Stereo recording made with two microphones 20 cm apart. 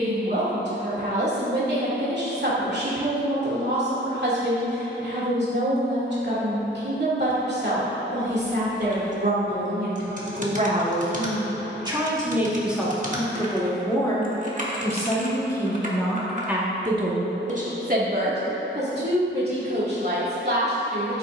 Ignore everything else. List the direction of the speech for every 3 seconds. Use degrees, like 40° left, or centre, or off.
60° right, 60° right, 60° right, 40° right, 10° left, 10° right, 60° right.